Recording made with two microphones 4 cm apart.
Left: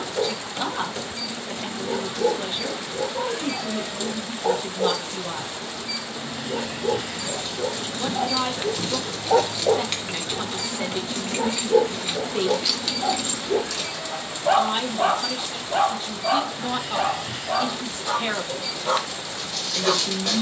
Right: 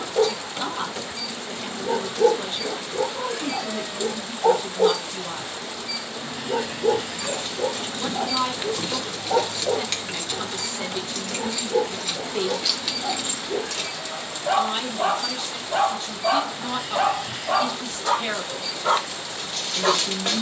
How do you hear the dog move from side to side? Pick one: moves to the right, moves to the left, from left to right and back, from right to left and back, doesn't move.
from right to left and back.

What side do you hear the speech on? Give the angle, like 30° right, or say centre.
10° left.